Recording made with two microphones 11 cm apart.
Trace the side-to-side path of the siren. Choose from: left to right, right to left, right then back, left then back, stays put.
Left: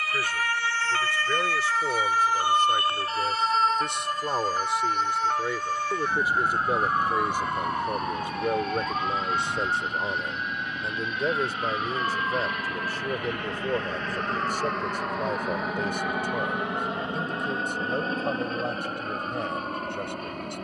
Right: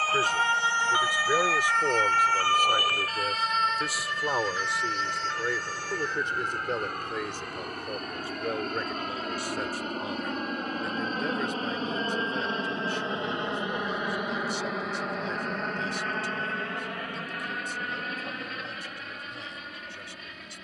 right to left.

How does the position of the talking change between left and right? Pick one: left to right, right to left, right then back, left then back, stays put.
right to left.